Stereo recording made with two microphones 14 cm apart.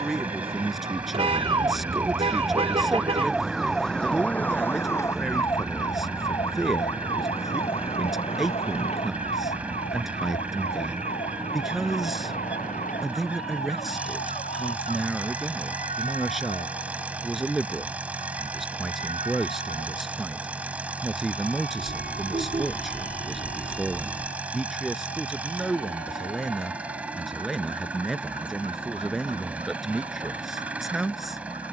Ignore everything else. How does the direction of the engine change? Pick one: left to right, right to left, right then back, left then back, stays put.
stays put.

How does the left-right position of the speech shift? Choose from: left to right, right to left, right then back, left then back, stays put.
stays put.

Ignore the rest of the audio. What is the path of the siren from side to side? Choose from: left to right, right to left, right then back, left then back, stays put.
right to left.